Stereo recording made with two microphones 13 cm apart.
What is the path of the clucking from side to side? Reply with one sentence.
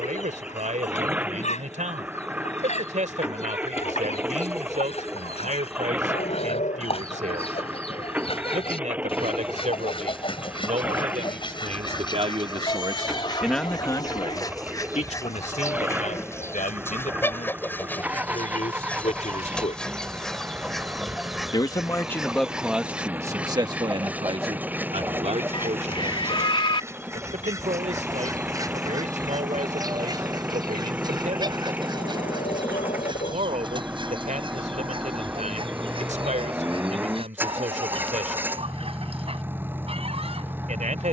In this clip you hear the clucking move to the right.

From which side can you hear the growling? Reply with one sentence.
In this clip you hear the growling on the left.